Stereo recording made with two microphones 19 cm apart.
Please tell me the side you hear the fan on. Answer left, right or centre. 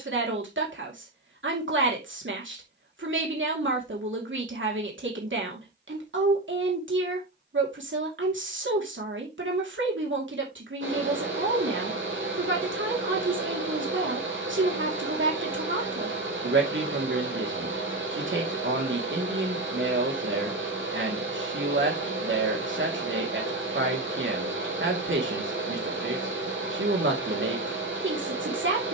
right.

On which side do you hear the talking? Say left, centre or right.
right.